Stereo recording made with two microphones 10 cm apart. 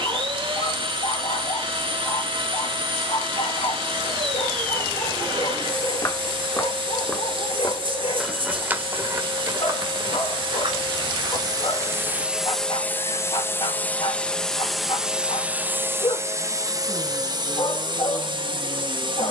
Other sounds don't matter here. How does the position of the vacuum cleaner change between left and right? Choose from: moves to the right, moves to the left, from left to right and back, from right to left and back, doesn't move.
from right to left and back.